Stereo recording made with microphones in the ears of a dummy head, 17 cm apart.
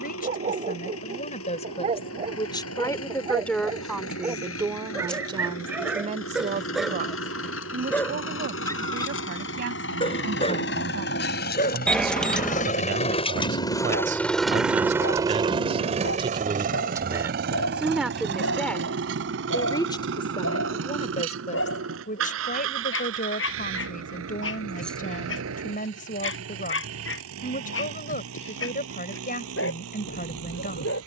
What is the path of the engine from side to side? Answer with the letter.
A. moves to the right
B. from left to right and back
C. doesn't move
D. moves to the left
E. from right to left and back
A.